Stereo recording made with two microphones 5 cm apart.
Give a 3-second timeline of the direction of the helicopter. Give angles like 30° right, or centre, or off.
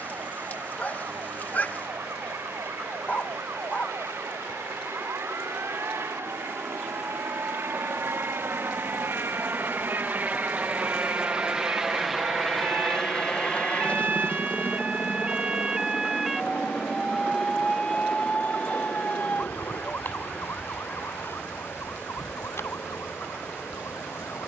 70° right, 70° right, 60° right, 30° right, 20° left, 50° left, 70° left, 70° left.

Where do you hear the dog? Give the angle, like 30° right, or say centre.
30° left.